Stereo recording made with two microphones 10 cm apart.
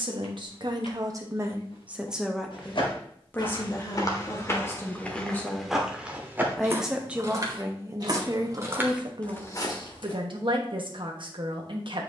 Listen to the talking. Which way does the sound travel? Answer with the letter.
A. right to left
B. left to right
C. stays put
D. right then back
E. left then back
E.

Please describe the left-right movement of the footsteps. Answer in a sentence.
In this clip you hear the footsteps move from left to right and back again.